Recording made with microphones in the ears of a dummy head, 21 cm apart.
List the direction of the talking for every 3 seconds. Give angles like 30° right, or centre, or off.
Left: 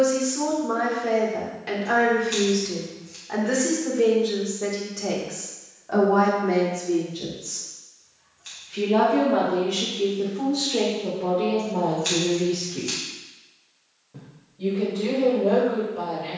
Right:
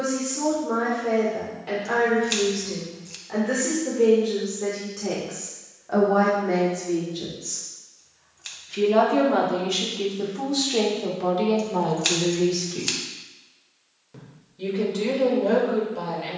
30° left, 20° left, 10° right, 40° right, 60° right, 70° right.